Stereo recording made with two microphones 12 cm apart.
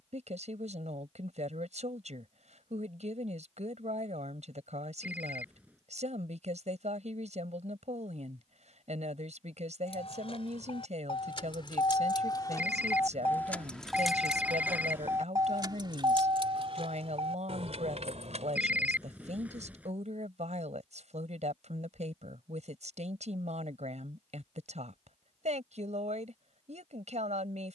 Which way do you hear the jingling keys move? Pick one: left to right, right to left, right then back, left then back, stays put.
left to right.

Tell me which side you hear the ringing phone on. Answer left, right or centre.
centre.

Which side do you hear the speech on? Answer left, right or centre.
right.